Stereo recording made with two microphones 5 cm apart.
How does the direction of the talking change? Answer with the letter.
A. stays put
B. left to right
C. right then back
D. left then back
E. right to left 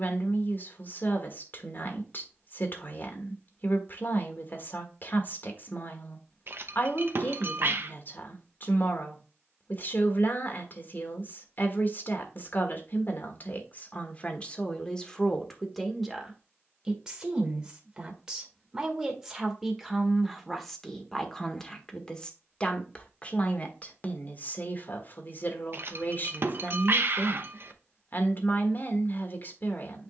C.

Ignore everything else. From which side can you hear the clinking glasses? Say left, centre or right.
right.